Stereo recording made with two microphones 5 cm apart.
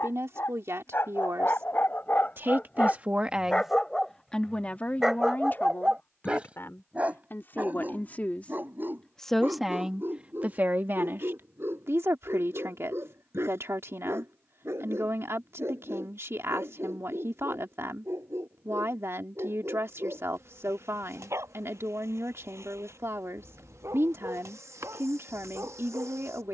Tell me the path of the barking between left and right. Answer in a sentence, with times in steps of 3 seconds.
You can hear the barking on the left from 0 s, in the centre from 3 s and on the right from 6 s.